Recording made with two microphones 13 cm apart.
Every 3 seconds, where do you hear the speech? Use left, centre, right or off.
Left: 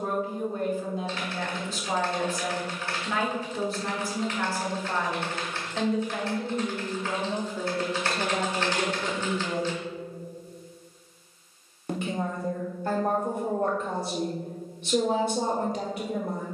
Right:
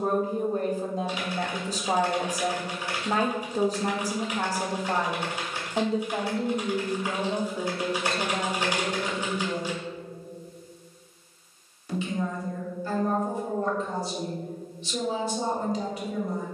right, right, centre, left, left, left.